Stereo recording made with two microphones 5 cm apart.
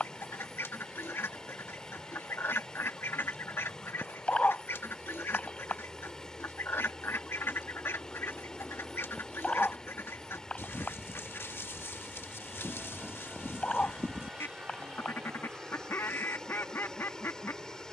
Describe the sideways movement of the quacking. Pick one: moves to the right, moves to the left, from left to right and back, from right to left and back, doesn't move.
doesn't move.